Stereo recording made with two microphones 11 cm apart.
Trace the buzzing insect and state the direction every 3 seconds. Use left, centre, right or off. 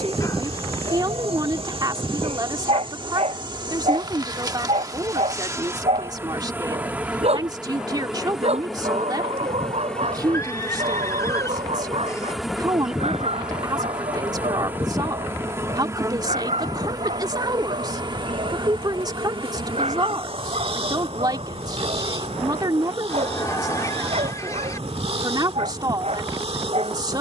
right, right, centre, centre, centre, right, right, right, right.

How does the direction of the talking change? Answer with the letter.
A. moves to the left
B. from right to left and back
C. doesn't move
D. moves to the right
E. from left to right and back
C.